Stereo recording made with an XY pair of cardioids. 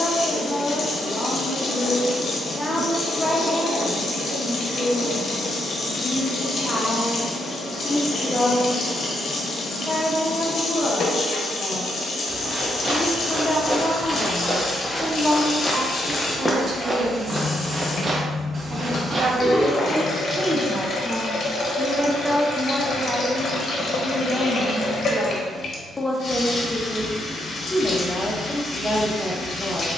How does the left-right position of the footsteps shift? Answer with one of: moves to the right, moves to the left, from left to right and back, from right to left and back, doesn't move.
from right to left and back.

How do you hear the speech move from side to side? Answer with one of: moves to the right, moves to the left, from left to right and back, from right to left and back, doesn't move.
from left to right and back.